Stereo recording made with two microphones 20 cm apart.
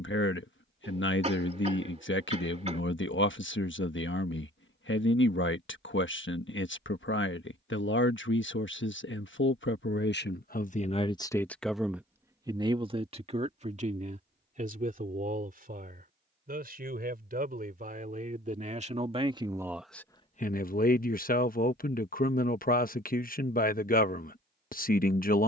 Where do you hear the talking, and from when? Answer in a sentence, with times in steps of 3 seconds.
You can hear the talking on the left from 0 s, on the right from 12 s, in the centre from 18 s and on the left from 21 s.